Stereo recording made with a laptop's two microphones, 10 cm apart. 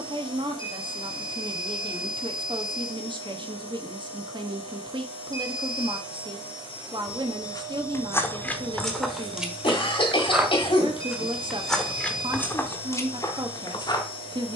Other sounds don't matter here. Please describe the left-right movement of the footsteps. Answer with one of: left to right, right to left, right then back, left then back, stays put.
right then back.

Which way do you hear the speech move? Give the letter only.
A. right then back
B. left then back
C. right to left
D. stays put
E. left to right
D.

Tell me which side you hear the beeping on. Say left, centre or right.
right.